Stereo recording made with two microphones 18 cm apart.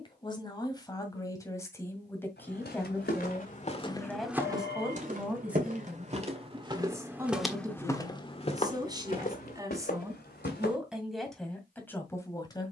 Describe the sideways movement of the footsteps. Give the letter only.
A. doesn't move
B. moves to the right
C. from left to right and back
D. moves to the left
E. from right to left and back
C.